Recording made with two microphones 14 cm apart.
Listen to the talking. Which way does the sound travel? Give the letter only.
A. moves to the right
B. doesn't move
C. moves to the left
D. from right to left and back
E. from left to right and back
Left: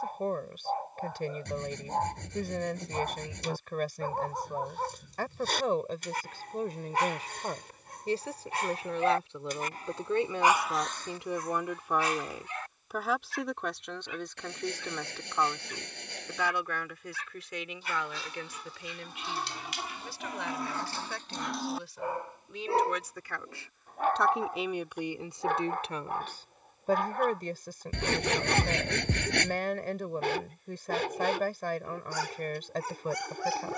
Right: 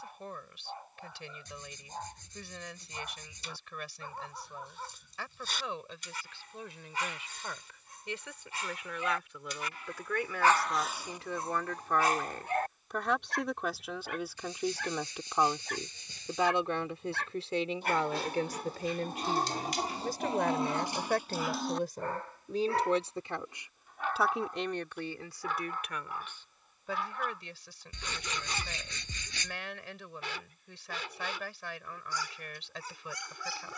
E.